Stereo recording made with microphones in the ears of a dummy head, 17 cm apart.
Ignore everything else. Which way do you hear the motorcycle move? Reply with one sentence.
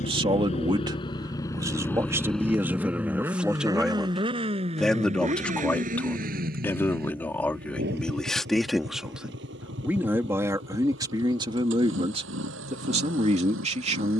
You can hear the motorcycle move to the right.